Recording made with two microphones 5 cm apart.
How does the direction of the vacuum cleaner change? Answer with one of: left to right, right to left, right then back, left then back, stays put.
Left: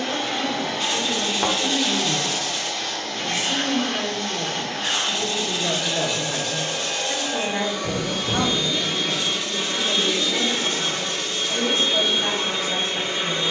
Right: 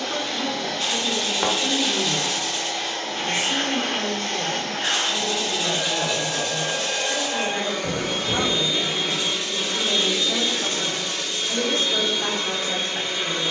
right then back.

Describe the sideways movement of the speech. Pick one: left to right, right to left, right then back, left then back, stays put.
left then back.